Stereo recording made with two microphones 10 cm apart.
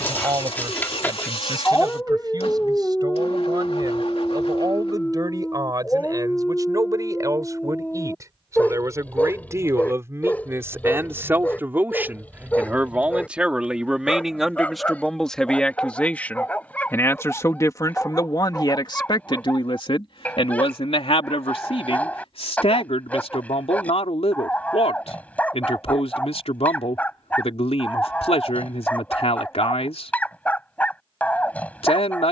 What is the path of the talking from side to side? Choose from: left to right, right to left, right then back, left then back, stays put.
right to left.